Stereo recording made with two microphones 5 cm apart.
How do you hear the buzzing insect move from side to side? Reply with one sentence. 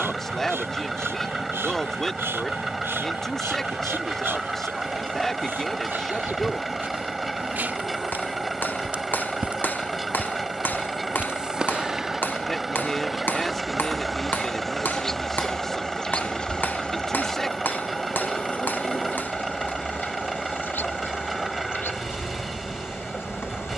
You can hear the buzzing insect travel towards the left.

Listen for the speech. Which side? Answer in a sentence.
In this clip you hear the speech in the centre.